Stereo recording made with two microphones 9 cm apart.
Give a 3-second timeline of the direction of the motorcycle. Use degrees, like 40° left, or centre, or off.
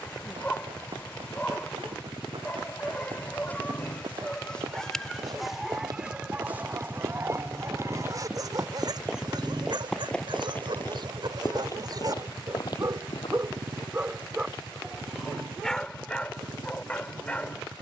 50° left, 40° left, 20° left, 20° right, 50° right, 70° right.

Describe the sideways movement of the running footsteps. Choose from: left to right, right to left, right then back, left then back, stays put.
right to left.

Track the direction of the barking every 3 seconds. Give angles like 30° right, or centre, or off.
20° left, 10° left, 30° right, 60° right, 30° right, 10° left.